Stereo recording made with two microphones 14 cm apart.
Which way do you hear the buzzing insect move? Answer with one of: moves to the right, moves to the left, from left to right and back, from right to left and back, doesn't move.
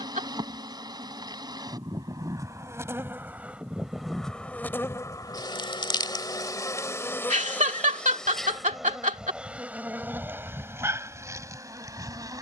from right to left and back.